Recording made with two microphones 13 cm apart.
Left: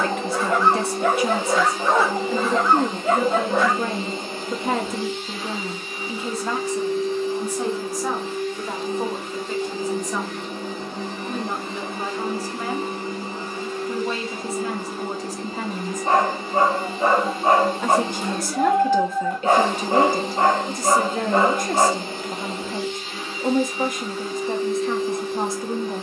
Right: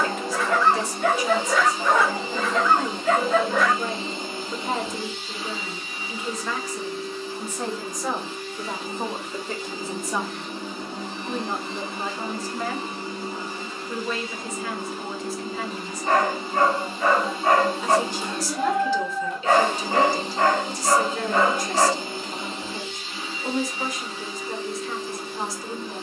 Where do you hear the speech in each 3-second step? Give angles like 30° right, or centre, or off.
60° left, 60° left, 10° left, centre, 20° left, 40° left, 50° left, 50° left, 50° left.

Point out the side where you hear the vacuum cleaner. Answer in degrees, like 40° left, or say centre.
50° left.